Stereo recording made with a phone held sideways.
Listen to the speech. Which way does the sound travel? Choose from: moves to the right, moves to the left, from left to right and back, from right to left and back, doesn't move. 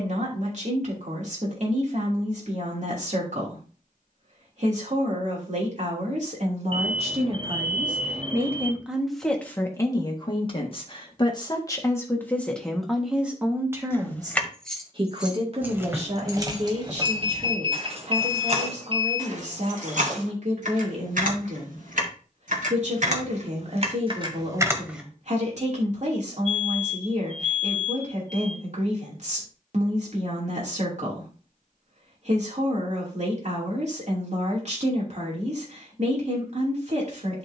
from right to left and back.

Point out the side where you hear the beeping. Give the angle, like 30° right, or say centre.
40° right.